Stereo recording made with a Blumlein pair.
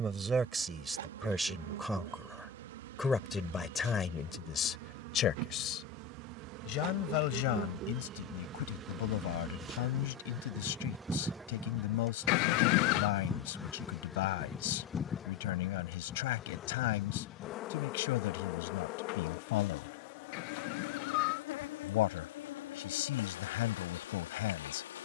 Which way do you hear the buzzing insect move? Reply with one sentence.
You can hear the buzzing insect move from right to left.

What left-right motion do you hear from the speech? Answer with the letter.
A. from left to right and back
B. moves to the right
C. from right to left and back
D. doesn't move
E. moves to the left
E.